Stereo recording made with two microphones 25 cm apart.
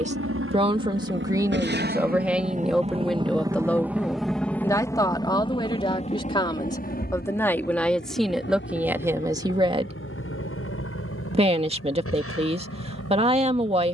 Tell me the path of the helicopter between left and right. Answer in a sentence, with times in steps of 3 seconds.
In this clip you hear the helicopter on the right from 0 s, in the centre from 3 s and on the left from 6 s.